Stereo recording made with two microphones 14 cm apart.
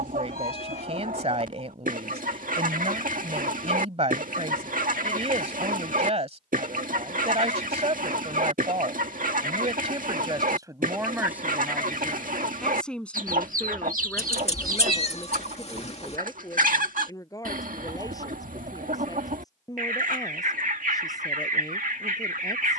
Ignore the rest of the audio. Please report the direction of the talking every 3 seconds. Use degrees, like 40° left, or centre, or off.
50° right, 50° right, 50° right, 30° right, 10° left, 20° left, 30° left, 30° left.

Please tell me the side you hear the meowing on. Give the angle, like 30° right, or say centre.
50° left.